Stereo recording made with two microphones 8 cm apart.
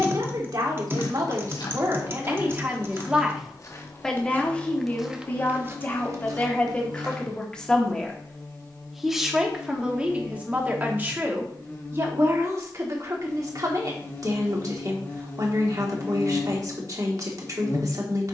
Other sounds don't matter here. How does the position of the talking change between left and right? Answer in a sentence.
You can hear the talking go left and come back.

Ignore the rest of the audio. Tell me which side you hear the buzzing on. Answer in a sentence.
You can hear the buzzing on the left.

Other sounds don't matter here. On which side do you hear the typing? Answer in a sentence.
You can hear the typing on the right.